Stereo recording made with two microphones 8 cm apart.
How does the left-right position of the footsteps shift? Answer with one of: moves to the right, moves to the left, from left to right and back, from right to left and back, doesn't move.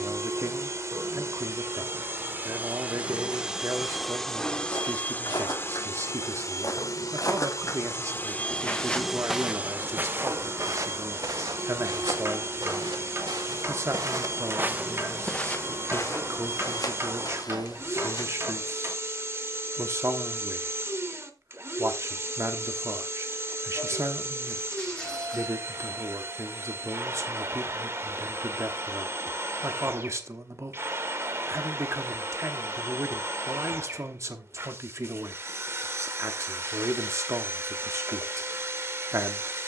from left to right and back.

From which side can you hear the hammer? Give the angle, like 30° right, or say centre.
40° right.